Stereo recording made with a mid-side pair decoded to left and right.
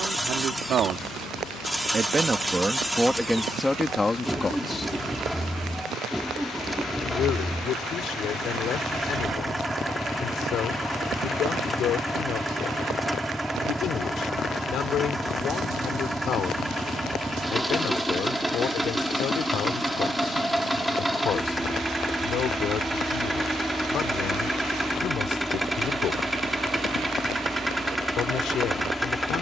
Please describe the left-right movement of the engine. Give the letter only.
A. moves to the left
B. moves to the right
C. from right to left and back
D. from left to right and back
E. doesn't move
E.